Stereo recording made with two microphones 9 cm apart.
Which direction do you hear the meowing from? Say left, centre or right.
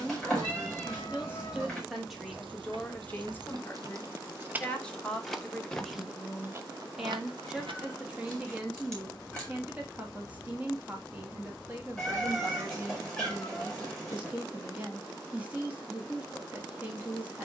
centre.